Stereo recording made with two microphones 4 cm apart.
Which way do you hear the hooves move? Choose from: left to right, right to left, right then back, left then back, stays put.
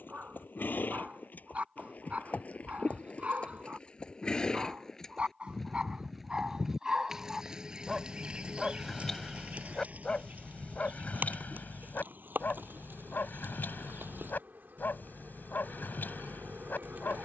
left to right.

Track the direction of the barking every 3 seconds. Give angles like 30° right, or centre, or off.
30° right, 30° right, 10° right, 30° left, 50° left, 50° left.